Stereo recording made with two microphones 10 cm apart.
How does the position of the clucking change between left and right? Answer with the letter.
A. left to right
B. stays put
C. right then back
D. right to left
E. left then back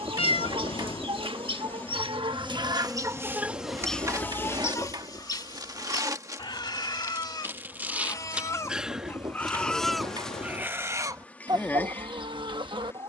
E.